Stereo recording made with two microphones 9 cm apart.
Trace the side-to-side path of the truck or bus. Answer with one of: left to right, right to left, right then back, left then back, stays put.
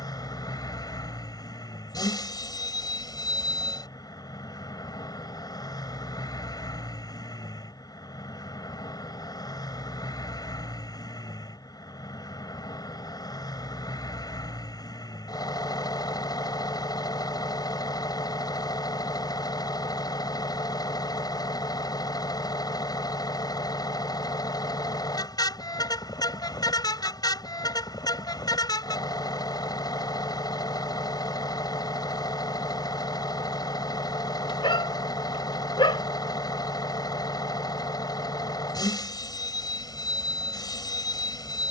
stays put.